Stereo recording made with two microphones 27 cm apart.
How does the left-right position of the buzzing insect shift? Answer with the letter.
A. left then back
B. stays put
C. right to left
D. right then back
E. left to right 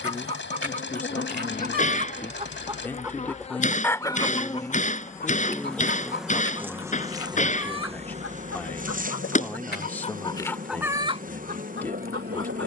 E.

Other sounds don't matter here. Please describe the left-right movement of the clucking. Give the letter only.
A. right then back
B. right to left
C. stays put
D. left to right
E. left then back
E.